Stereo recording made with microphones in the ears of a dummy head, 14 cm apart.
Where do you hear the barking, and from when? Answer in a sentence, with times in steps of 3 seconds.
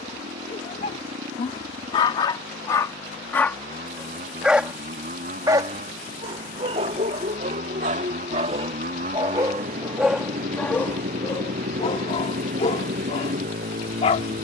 You can hear the barking on the left from 0 s, in the centre from 3 s, on the right from 6 s, in the centre from 9 s and on the left from 12 s.